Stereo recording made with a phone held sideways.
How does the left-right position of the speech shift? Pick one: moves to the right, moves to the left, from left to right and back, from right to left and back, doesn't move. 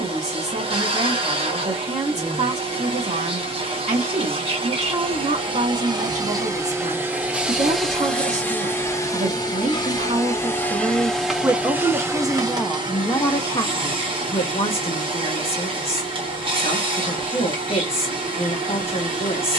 moves to the left.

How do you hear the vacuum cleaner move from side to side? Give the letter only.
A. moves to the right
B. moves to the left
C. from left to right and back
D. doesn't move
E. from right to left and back
E.